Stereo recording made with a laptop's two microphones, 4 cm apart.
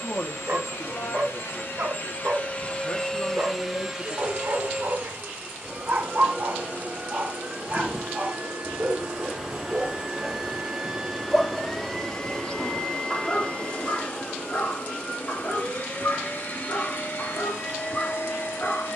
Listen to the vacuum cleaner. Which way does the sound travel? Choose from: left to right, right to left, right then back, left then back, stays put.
right then back.